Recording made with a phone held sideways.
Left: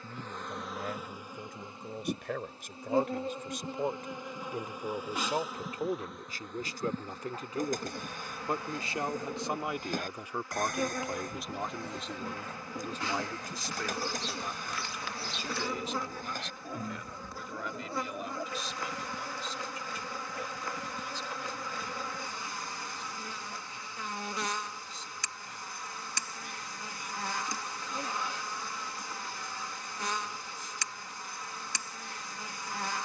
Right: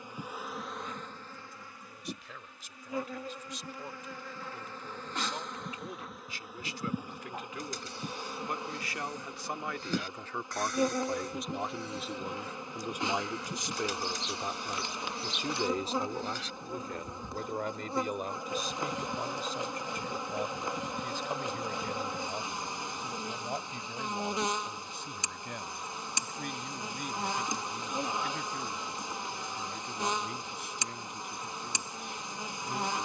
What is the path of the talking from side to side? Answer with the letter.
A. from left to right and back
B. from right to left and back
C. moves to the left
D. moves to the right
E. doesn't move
D.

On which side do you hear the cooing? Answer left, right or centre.
left.